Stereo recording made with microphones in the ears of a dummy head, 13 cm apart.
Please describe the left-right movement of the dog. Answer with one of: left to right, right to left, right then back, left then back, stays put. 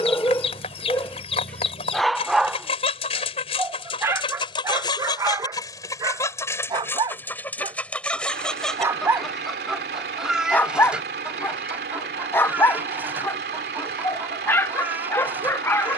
right then back.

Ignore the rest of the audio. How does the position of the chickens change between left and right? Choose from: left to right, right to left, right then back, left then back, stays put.
left to right.